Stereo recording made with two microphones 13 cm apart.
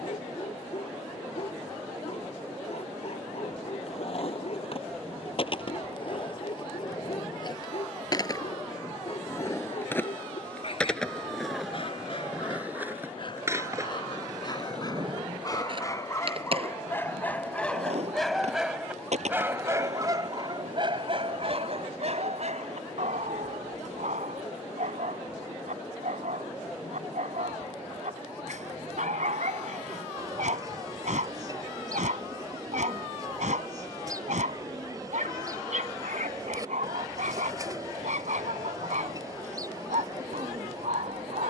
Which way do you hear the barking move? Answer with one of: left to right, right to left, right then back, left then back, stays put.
left to right.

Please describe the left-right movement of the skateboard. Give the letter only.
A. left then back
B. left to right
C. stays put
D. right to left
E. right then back
B.